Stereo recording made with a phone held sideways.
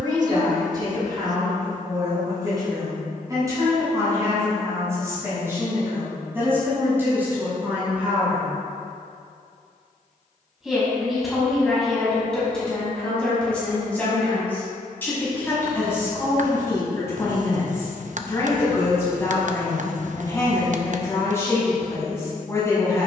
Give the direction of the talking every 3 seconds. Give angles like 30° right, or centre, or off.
30° right, 20° right, 10° right, centre, 10° left, 20° left, 20° left, 20° left.